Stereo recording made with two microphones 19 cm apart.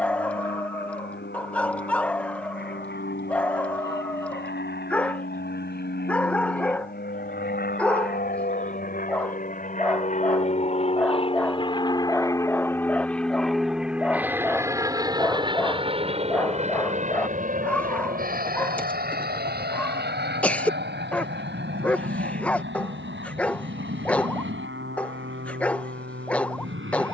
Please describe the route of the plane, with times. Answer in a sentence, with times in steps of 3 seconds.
In this clip you hear the plane on the left from 0 s, in the centre from 12 s and on the right from 15 s.